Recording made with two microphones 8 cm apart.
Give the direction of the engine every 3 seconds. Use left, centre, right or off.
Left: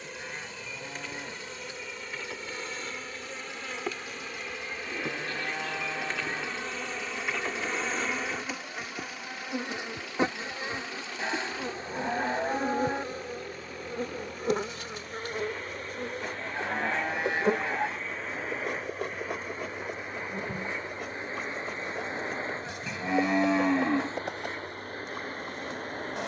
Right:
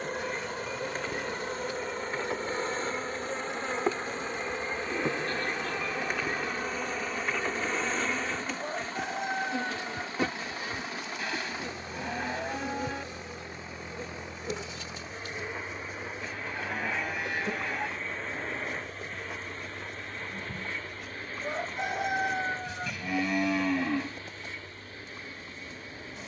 right, right, right, right, right, centre, centre, left, left.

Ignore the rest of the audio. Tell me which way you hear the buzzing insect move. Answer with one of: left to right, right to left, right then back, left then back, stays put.
right to left.